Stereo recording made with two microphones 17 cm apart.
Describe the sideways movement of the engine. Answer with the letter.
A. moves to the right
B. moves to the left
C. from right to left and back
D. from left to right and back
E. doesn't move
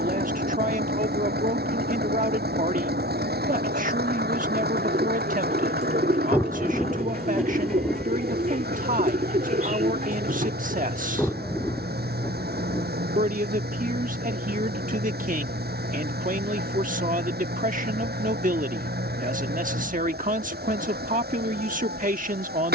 E.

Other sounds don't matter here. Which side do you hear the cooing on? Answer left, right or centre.
right.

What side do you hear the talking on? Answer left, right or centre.
right.